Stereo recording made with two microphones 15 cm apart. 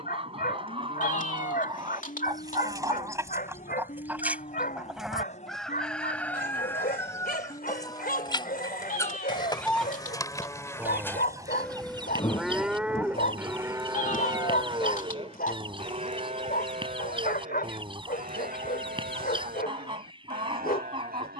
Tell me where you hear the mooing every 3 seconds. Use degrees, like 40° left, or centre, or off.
60° left, 50° left, 40° left, 20° left, 20° right, 50° right, 70° right.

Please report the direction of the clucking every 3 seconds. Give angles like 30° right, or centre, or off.
30° right, 10° right, 20° left, 10° right, 30° right, 30° right, 30° right.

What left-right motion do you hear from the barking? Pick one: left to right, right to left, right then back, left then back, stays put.
stays put.